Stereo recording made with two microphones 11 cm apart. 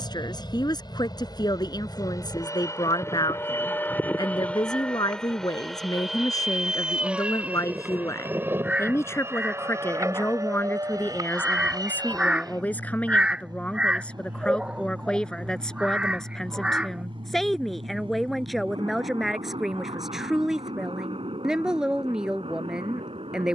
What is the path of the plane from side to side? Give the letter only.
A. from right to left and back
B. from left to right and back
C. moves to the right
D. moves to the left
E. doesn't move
C.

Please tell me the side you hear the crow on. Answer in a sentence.
In this clip you hear the crow in the centre.